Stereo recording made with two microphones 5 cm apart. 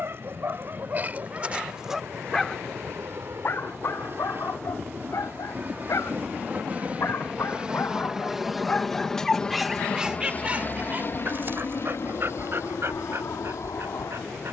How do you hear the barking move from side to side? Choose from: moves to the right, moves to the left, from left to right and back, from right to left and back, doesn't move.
from right to left and back.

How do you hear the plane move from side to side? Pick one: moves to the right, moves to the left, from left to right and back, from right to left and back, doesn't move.
moves to the left.